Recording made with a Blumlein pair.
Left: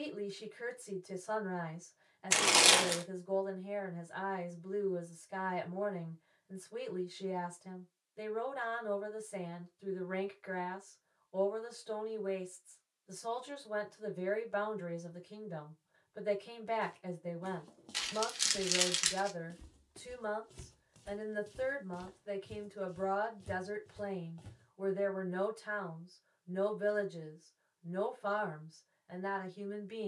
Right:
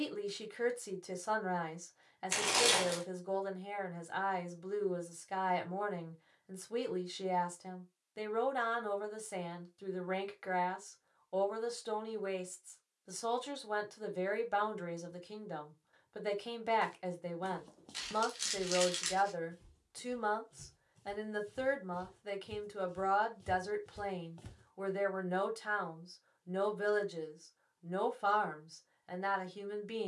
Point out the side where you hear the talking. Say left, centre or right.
right.